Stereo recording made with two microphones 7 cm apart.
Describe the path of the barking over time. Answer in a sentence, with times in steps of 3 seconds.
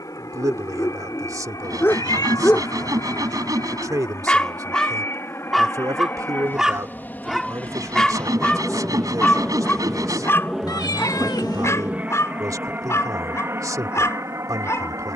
You can hear the barking on the left from 0 s, in the centre from 3 s and on the left from 9 s.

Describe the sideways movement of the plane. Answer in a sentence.
You can hear the plane move from left to right.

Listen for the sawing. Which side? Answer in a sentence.
You can hear the sawing on the right.